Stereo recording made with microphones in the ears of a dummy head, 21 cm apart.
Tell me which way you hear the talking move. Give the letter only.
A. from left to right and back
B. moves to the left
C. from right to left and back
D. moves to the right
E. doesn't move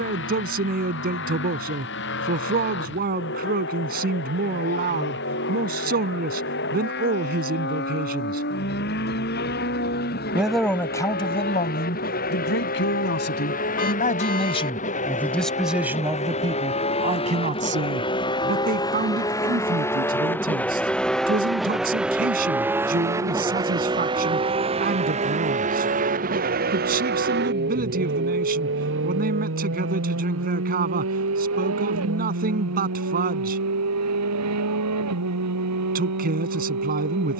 C.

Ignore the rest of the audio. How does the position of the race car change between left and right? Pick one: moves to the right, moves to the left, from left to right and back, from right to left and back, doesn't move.
moves to the right.